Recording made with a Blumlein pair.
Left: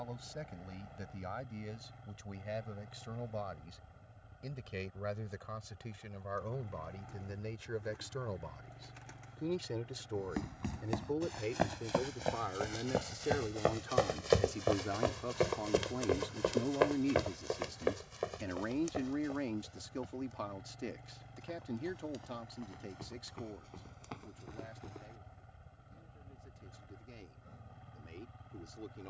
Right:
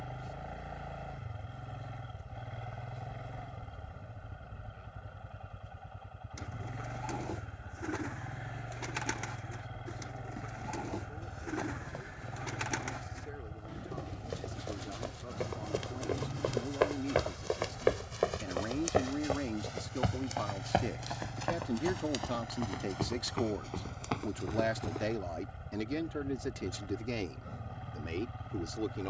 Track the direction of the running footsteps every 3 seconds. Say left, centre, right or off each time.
off, off, off, left, left, centre, right, right, right, off.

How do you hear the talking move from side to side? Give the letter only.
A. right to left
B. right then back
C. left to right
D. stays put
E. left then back
C.